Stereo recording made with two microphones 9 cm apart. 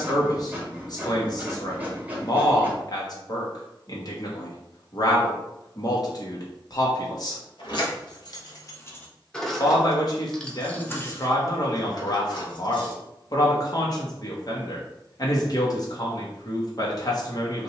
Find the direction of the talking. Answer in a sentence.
In this clip you hear the talking on the left.